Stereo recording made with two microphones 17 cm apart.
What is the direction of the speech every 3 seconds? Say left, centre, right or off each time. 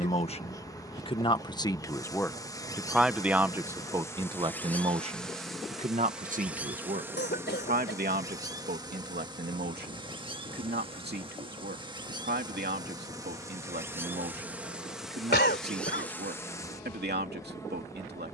left, right, right, right, right, right.